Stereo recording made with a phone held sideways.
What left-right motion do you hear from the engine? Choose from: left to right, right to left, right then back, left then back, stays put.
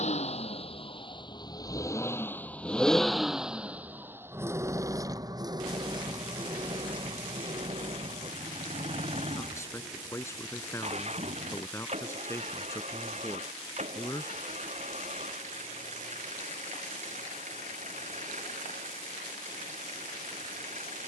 left to right.